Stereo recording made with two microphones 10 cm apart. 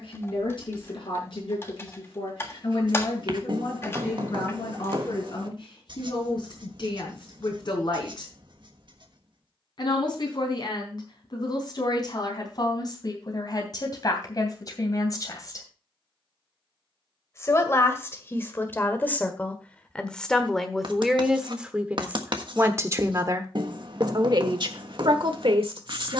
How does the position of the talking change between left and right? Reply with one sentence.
You can hear the talking move from left to right.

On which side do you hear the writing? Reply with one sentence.
You can hear the writing on the right.